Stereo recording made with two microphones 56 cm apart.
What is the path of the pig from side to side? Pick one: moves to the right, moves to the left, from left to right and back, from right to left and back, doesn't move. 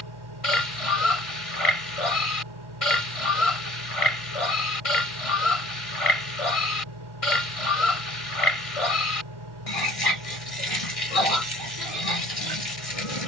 doesn't move.